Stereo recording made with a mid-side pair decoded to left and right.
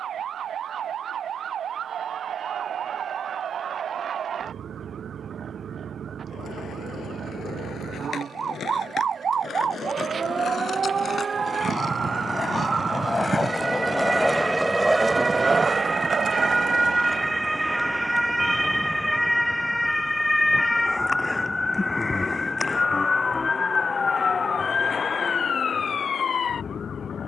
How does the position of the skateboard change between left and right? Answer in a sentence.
You can hear the skateboard move from left to right.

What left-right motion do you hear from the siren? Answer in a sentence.
You can hear the siren travel towards the left.